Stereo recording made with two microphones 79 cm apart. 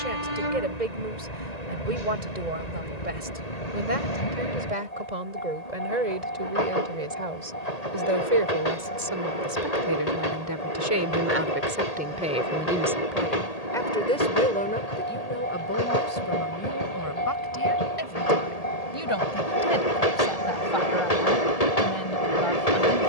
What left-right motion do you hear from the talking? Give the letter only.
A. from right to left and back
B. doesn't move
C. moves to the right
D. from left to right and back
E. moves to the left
E.